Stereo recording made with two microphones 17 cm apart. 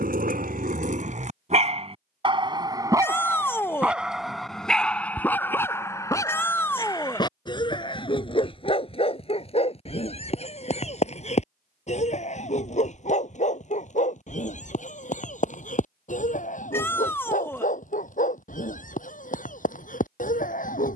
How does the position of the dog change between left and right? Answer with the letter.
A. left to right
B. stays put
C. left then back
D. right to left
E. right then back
D.